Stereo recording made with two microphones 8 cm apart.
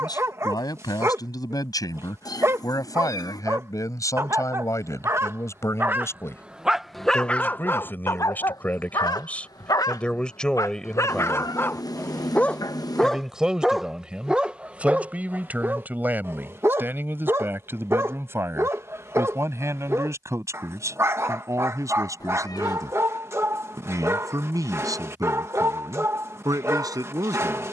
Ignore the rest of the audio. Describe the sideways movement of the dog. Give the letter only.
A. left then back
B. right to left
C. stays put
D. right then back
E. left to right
A.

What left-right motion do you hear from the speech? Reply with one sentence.
In this clip you hear the speech travel towards the right.